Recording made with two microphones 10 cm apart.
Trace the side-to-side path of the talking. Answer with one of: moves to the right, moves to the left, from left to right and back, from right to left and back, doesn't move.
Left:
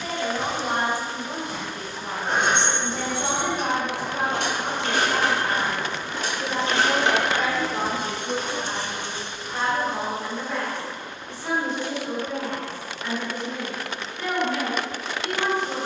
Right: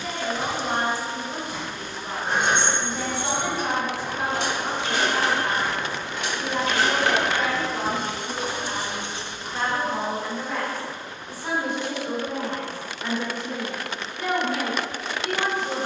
moves to the right.